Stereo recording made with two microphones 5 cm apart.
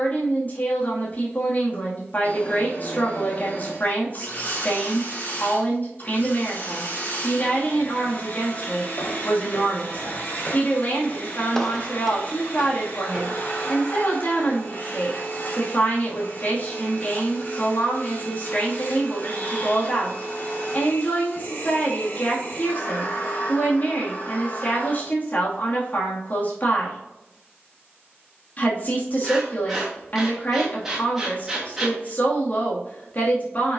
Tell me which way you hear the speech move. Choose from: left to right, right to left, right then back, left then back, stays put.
stays put.